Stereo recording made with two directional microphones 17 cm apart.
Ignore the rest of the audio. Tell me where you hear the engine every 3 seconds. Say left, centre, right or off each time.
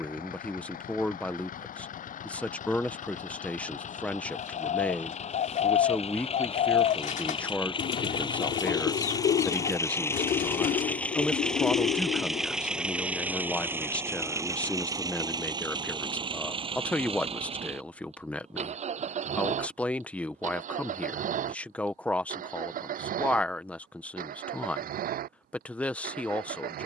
left, left, left, centre, centre, right, right, right, right.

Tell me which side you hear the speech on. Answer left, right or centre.
centre.